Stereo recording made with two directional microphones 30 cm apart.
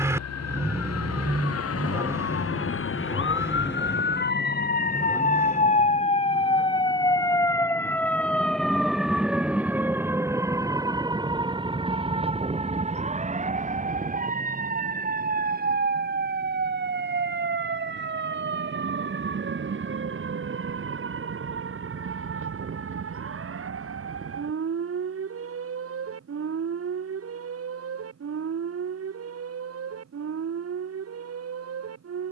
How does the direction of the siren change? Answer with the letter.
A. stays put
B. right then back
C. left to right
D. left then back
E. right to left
C.